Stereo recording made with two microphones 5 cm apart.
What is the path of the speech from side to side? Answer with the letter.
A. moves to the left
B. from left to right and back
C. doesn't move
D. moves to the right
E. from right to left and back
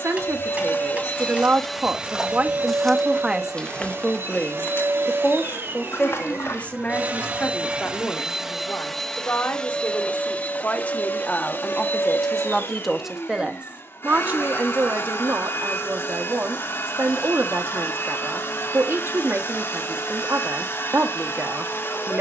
E.